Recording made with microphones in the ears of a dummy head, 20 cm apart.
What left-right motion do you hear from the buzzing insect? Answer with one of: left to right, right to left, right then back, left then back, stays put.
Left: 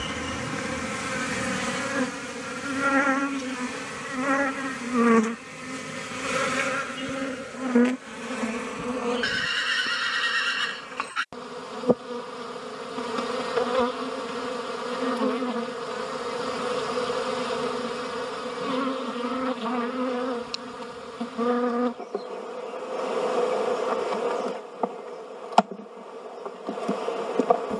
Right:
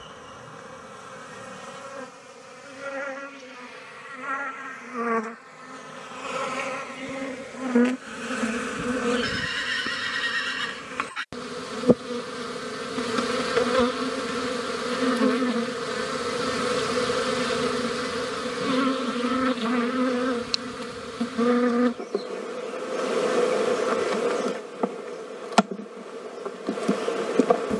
left to right.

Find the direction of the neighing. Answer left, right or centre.
centre.